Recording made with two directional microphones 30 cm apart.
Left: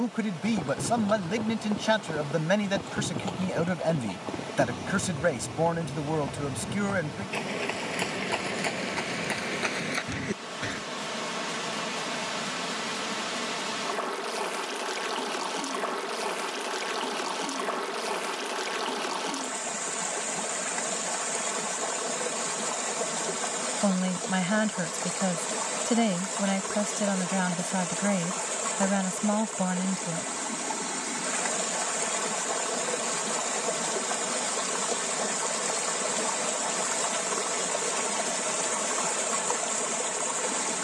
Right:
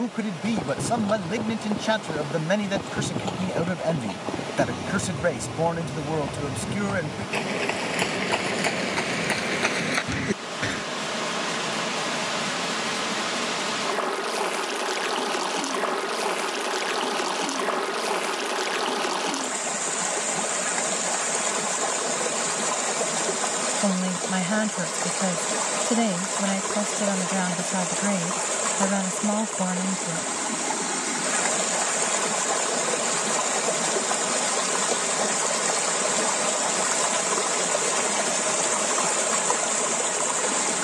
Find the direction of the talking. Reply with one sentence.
You can hear the talking in the centre.